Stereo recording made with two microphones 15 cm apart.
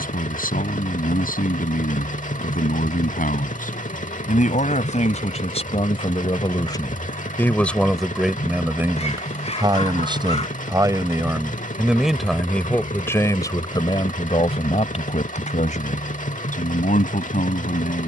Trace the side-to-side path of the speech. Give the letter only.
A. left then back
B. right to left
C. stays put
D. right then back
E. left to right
D.